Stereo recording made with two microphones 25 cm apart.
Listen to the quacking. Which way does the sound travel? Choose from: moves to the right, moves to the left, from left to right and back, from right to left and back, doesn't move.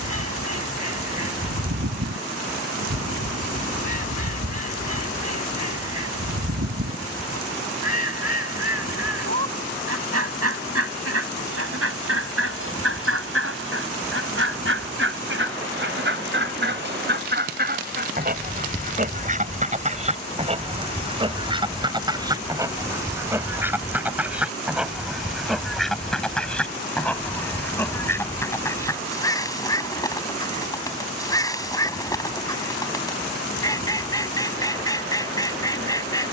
moves to the left.